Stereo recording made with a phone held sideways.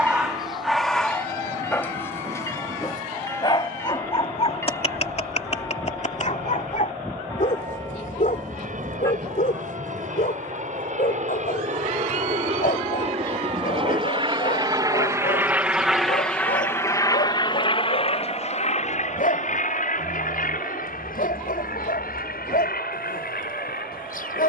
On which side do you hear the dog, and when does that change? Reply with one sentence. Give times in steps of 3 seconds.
In this clip you hear the dog in the centre from 0 s and on the left from 3 s.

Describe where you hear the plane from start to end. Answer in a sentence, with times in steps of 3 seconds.
In this clip you hear the plane on the right from 0 s, in the centre from 15 s and on the left from 18 s.